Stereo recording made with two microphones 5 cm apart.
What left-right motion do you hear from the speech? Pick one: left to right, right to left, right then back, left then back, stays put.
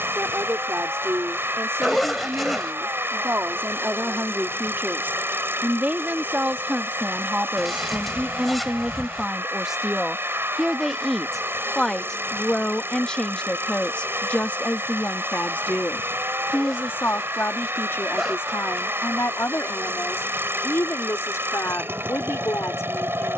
right to left.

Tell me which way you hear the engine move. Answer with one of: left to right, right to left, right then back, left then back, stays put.
stays put.